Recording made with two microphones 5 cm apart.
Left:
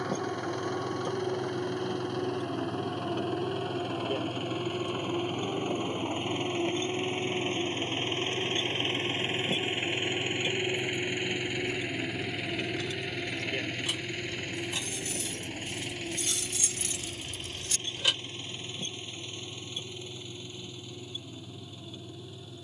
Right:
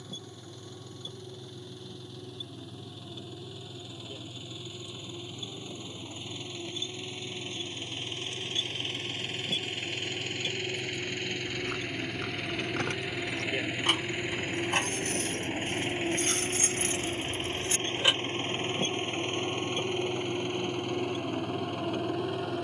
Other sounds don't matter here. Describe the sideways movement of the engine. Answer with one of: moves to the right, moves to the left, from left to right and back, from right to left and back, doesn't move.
moves to the right.